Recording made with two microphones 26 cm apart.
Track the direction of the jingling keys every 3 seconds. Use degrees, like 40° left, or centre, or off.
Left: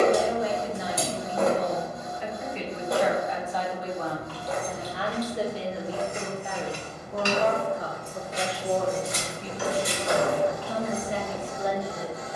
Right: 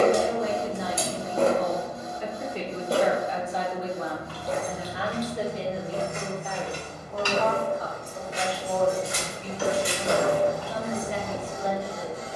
off, 40° left, 20° left, 20° left.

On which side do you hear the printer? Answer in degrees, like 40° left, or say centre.
30° right.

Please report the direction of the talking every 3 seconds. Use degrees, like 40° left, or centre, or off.
50° right, 10° right, 30° left, 40° left.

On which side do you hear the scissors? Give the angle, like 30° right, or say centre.
40° left.